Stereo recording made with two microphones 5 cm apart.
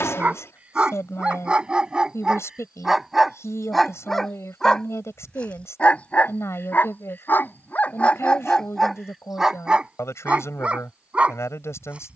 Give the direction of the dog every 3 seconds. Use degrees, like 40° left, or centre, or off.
20° right, 10° left, 30° left, 20° right.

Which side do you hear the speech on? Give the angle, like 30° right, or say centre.
70° left.